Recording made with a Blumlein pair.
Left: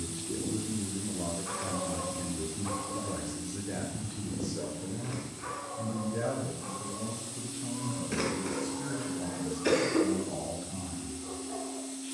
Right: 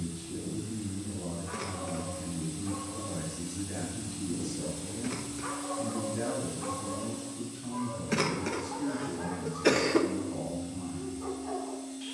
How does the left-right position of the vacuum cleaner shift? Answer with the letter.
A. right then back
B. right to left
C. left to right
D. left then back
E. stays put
A.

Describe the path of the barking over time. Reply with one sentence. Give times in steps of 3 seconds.
You can hear the barking on the left from 0 s, in the centre from 3 s and on the right from 6 s.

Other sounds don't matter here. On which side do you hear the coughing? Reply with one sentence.
In this clip you hear the coughing on the right.